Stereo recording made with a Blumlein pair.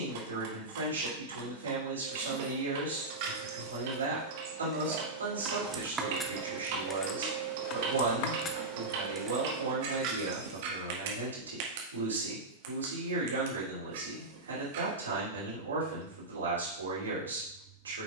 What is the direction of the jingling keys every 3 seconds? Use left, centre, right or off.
right, right, left, right, off, off.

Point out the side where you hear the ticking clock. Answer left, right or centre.
right.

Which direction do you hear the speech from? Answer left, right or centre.
right.